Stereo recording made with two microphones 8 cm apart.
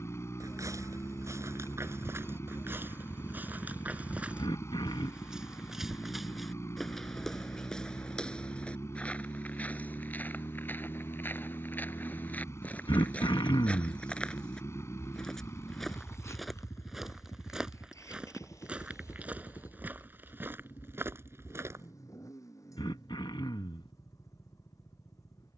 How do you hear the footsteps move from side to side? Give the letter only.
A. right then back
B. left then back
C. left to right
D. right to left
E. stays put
B.